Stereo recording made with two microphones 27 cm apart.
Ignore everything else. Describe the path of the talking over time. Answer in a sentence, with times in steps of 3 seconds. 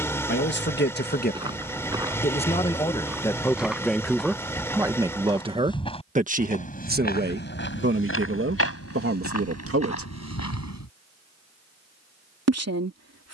In this clip you hear the talking on the left from 0 s, in the centre from 3 s and on the right from 6 s.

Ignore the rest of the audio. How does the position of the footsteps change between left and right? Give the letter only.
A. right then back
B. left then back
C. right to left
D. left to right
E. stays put
C.